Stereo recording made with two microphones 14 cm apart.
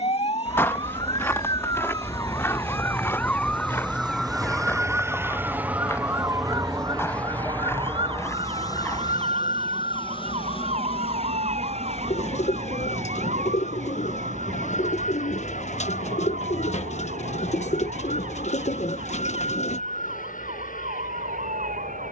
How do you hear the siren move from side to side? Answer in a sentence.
In this clip you hear the siren move from left to right.